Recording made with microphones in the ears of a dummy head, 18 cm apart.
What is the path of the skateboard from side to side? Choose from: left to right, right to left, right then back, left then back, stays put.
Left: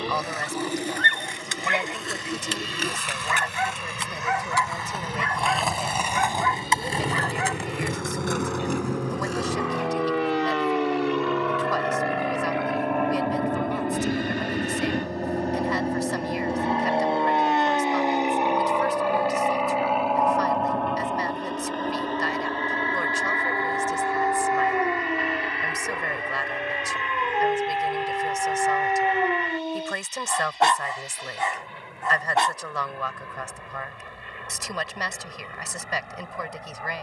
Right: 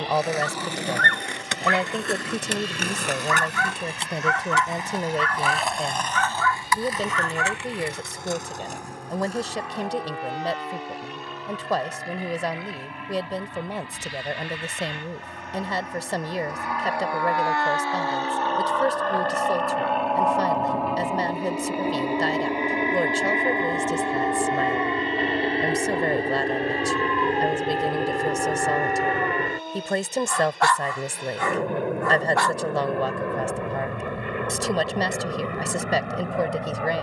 right to left.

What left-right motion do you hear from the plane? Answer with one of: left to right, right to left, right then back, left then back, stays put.
left to right.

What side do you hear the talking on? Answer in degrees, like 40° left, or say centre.
30° right.